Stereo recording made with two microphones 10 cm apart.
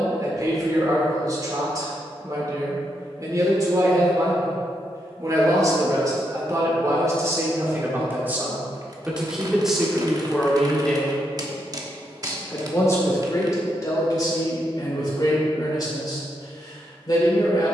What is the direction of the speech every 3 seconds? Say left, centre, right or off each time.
right, right, right, centre, left, left.